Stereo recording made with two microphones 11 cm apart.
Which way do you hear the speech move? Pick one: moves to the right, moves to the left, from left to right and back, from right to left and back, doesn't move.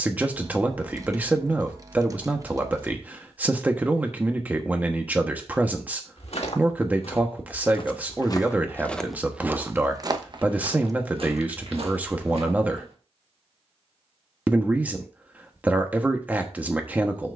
doesn't move.